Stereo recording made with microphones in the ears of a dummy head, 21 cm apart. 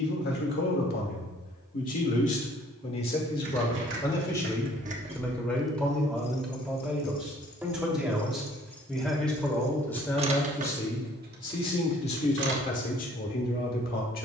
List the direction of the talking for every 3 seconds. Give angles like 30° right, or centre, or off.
40° left, 20° left, centre, 10° left, 40° left.